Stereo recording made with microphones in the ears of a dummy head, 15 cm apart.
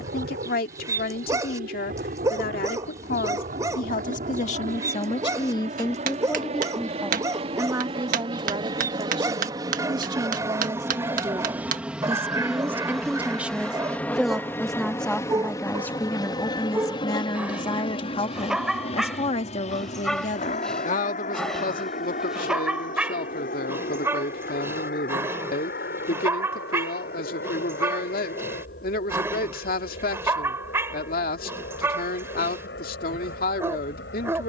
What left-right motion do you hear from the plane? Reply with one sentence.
You can hear the plane move from right to left.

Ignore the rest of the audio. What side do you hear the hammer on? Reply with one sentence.
In this clip you hear the hammer on the right.